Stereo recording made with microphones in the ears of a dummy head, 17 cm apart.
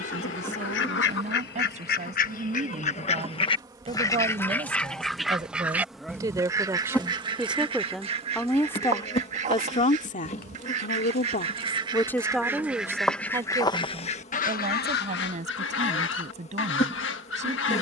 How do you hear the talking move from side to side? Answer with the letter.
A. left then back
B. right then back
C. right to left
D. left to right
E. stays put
A.